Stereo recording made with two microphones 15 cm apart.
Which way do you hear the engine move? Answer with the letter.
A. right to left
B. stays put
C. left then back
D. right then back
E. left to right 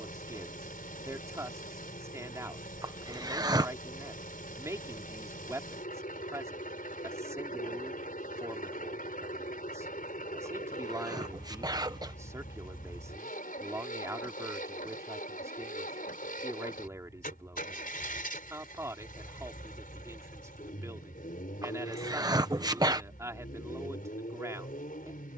B.